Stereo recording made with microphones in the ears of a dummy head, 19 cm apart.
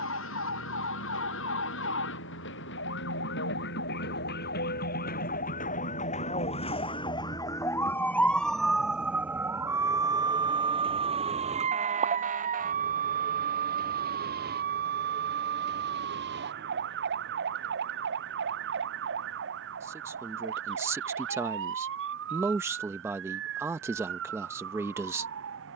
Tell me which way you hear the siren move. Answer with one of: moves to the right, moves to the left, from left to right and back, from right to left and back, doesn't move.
moves to the right.